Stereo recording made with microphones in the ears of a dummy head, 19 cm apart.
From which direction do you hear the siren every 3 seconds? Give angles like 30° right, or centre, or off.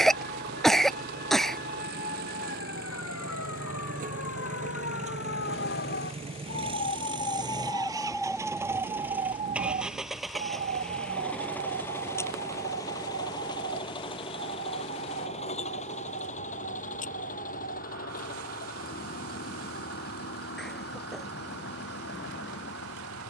80° left, 60° left, 10° left, 40° right, 60° right, 70° right, 70° right, 70° right.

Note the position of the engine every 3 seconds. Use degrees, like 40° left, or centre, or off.
50° right, 40° right, 20° right, centre, 20° left, 40° left, 50° left, 50° left.